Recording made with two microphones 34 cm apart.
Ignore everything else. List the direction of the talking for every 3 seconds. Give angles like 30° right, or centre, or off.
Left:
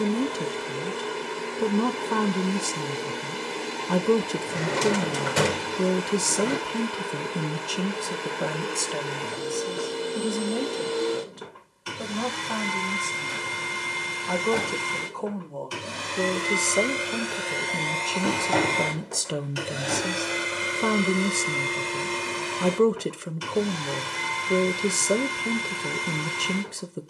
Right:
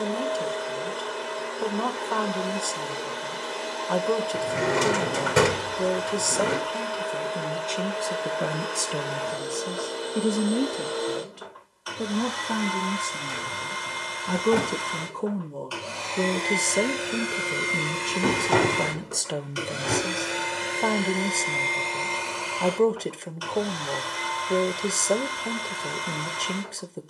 30° left, 30° left, 20° left, 30° right, 30° right, 10° right, 10° left, 20° left, 20° left.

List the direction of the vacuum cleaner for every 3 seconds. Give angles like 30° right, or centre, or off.
30° left, 30° left, 30° left, 30° left, 30° left, 10° left, 10° right, 20° left, 30° left.